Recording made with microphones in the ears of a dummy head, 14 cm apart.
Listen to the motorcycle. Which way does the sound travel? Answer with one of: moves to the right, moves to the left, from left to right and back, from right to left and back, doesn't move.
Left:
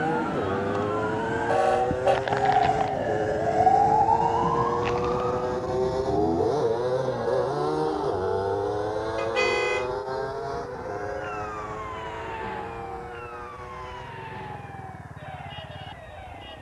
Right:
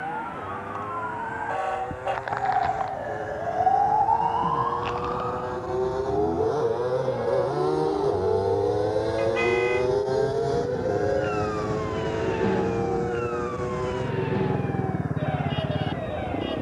moves to the right.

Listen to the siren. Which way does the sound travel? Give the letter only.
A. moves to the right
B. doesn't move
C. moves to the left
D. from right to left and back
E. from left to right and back
A.